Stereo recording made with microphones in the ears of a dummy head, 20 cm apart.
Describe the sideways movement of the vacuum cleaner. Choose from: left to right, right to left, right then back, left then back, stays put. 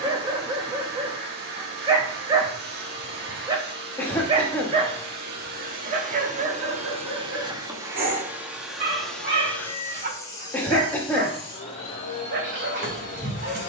right to left.